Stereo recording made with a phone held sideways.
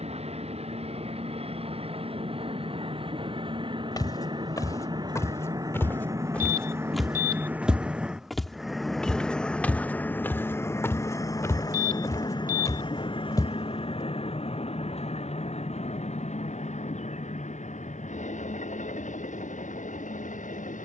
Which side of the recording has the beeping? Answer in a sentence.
You can hear the beeping on the right.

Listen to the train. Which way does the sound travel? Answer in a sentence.
You can hear the train travel towards the left.